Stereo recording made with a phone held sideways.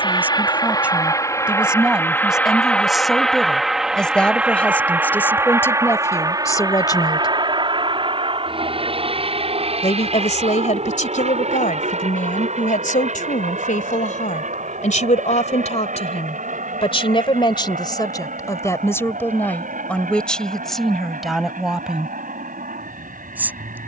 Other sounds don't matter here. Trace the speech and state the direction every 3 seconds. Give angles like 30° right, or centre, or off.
10° right, 10° left, 30° left, 60° left, 70° left, 50° left, 10° left, 10° right.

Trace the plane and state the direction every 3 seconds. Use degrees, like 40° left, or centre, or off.
20° left, 10° right, 30° right, 50° right, 60° right, 60° right, 70° right, 70° right.